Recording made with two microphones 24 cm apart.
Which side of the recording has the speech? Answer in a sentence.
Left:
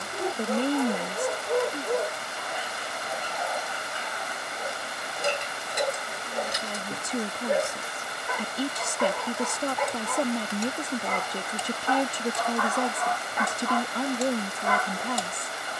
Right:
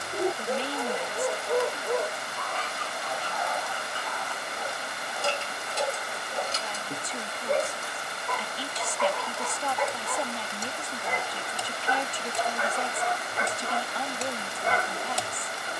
You can hear the speech on the left.